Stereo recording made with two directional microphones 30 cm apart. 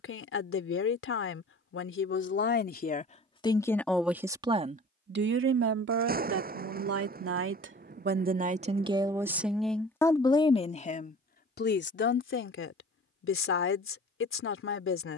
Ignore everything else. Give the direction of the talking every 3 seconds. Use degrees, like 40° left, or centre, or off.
40° left, 20° right, 40° right, 10° left, 40° left.